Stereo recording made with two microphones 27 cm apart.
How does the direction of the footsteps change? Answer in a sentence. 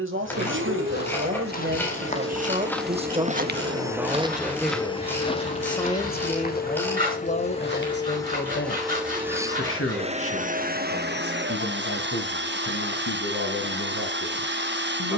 You can hear the footsteps go right and come back.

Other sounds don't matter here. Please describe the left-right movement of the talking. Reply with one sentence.
You can hear the talking move from right to left.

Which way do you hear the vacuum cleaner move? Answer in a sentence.
You can hear the vacuum cleaner move from right to left and back again.